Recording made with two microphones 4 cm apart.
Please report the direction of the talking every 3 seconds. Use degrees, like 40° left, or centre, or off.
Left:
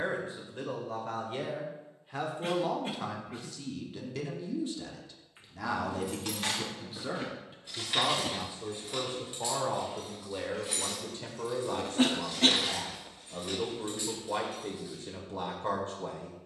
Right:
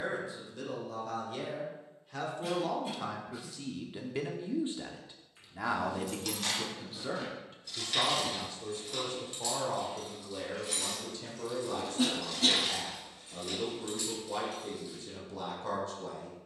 30° left, 20° right, 10° left, 30° left, 40° left, 40° left.